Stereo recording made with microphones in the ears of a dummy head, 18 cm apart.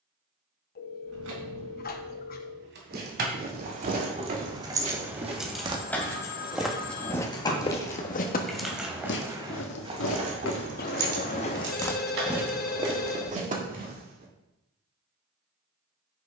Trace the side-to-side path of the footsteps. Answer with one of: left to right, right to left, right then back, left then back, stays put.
left then back.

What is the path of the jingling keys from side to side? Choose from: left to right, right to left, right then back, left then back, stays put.
left then back.